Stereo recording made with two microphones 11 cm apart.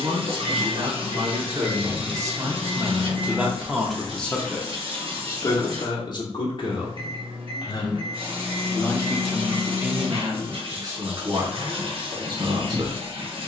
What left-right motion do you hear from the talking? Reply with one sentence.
In this clip you hear the talking move from right to left and back again.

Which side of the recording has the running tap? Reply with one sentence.
In this clip you hear the running tap on the right.